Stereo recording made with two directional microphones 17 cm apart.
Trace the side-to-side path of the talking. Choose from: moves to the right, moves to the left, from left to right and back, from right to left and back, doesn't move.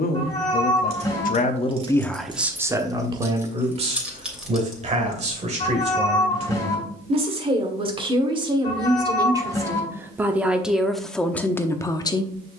from left to right and back.